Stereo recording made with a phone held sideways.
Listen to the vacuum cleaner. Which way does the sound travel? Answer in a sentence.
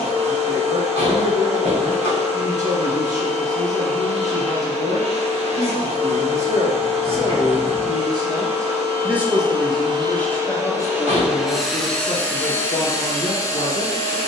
In this clip you hear the vacuum cleaner move from right to left.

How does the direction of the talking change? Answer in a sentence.
You can hear the talking move to the left.